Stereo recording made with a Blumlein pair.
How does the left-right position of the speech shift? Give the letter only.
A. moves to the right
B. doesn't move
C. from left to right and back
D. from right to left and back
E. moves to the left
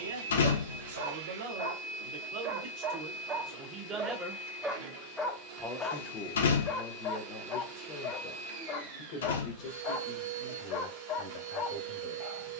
E.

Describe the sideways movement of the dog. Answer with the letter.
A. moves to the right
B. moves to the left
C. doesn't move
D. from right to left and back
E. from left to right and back
B.